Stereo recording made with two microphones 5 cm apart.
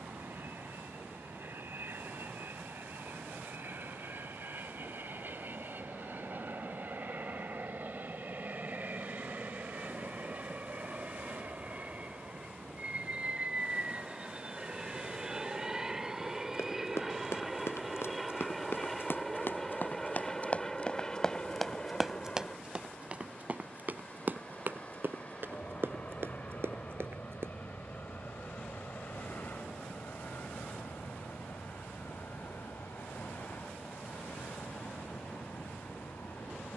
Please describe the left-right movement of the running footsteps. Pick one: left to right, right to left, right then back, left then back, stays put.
left to right.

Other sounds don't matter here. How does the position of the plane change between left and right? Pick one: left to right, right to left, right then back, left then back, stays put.
right to left.